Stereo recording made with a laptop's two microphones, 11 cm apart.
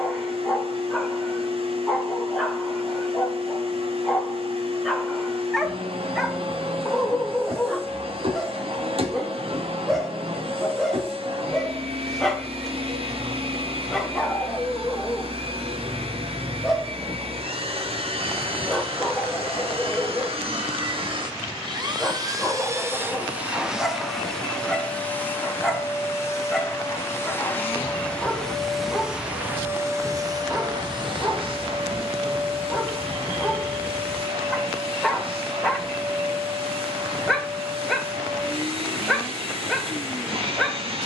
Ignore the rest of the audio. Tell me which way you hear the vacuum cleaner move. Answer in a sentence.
In this clip you hear the vacuum cleaner go left and come back.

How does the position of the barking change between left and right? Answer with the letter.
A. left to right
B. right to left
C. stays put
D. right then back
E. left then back
C.